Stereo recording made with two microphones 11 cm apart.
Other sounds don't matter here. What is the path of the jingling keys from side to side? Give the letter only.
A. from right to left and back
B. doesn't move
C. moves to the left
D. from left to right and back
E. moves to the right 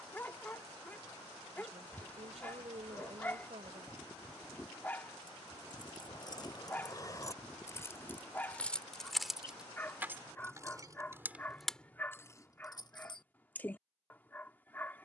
D.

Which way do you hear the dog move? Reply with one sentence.
In this clip you hear the dog stay in one place.